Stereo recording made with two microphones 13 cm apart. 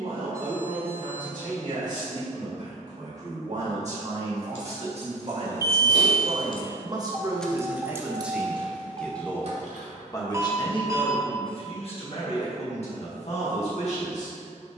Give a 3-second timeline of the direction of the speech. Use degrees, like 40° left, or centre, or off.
70° right, 50° right, 20° right, 30° left, 60° left.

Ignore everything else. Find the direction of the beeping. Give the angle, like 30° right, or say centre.
20° right.